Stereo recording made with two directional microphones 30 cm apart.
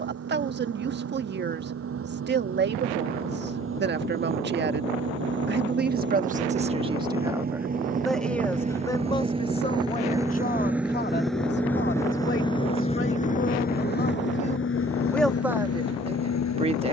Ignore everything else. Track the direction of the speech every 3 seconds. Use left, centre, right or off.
right, right, centre, left, left, centre.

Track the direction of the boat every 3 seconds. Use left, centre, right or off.
right, right, right, centre, left, left.